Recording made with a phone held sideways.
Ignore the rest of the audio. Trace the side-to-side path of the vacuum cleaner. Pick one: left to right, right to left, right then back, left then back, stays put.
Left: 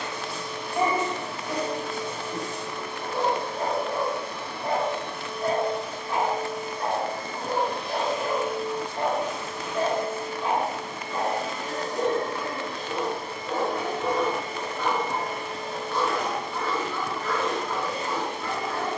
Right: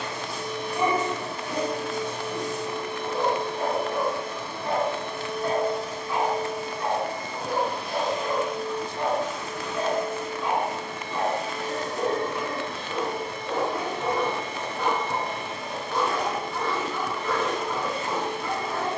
right to left.